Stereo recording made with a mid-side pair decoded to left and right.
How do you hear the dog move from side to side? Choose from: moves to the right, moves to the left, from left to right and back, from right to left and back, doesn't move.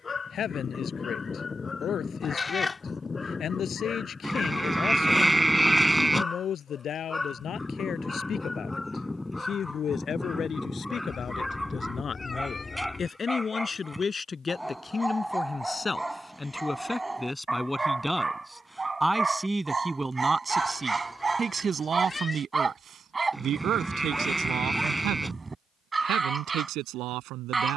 moves to the right.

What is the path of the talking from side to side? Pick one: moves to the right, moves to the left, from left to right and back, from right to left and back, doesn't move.
moves to the right.